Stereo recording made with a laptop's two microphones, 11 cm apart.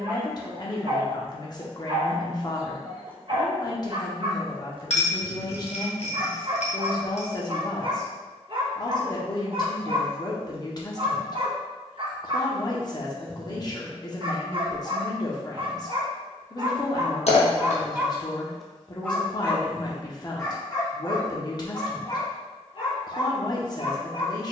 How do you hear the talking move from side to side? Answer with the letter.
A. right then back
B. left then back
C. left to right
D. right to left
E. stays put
E.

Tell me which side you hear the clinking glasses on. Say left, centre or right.
left.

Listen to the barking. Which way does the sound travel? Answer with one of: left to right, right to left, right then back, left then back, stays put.
right to left.